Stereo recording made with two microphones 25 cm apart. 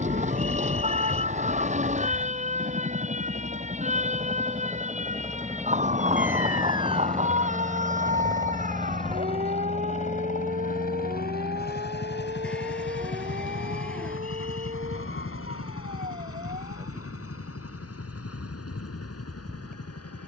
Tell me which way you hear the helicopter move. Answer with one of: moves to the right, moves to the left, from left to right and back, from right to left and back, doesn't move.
moves to the left.